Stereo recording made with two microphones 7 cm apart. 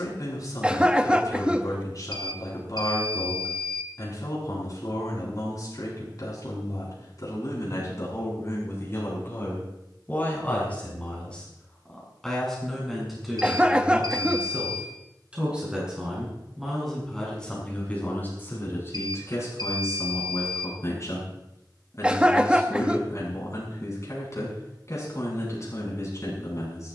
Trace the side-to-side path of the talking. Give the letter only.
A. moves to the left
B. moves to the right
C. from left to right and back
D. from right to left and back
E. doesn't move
C.